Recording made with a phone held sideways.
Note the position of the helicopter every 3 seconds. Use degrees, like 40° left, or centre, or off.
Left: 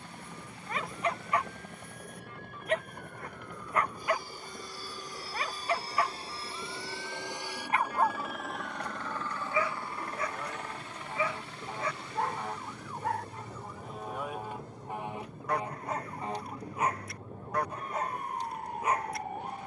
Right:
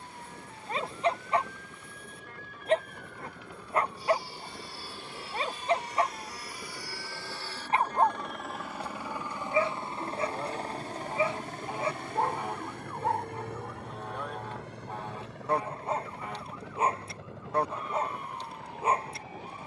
60° left, 40° left, 10° left, 30° right, 60° right, 70° right, 70° right.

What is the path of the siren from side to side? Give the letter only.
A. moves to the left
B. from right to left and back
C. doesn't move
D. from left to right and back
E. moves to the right
A.